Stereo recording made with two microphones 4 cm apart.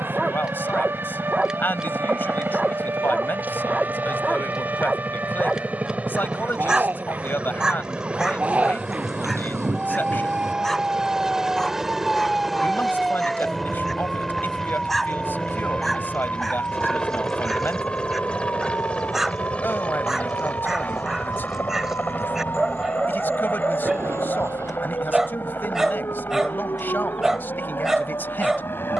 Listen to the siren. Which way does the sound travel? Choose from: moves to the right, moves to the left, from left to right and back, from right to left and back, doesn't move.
moves to the left.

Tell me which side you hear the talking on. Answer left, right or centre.
left.